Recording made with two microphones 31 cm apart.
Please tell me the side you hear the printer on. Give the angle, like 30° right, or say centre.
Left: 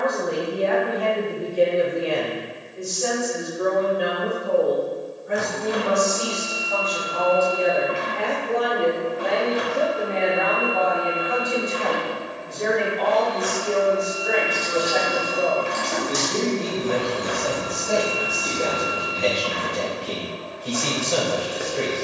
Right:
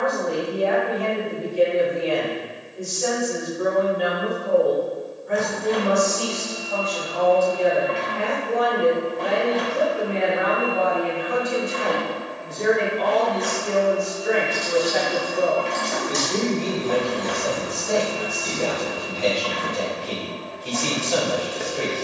10° left.